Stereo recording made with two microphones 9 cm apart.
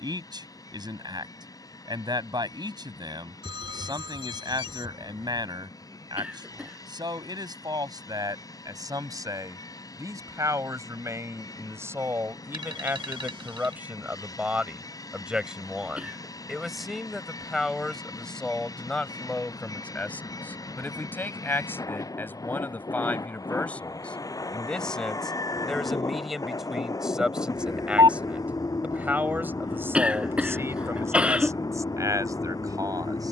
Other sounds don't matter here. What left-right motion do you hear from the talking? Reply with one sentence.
In this clip you hear the talking move from right to left and back again.